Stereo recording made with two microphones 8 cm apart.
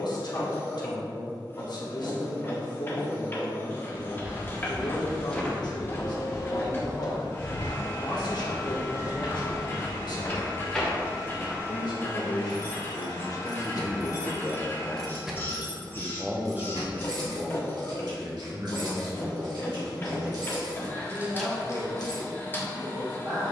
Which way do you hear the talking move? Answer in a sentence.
You can hear the talking travel towards the right.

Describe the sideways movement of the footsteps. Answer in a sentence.
In this clip you hear the footsteps move from right to left and back again.